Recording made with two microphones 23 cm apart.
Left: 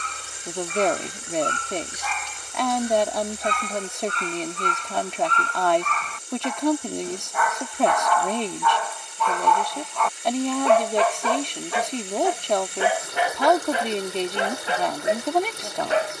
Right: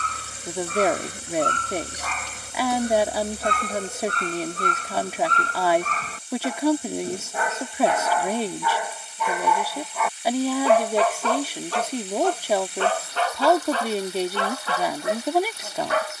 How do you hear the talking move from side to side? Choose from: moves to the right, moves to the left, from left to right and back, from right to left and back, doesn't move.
doesn't move.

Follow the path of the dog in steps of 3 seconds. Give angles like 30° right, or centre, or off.
60° right, 50° right, 30° right, centre, 20° left, 30° left.